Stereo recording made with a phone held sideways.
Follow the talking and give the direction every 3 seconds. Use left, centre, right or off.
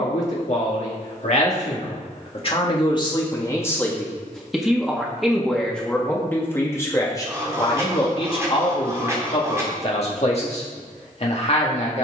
left, centre, left, left.